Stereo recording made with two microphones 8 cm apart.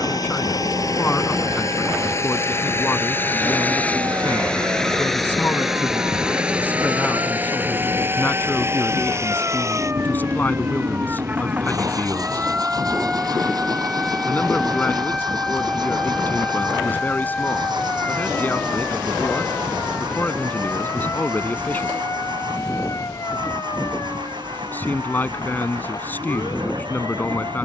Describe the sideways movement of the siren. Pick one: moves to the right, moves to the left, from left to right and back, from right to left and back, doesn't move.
moves to the left.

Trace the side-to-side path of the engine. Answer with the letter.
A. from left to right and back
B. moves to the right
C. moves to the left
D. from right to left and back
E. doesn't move
B.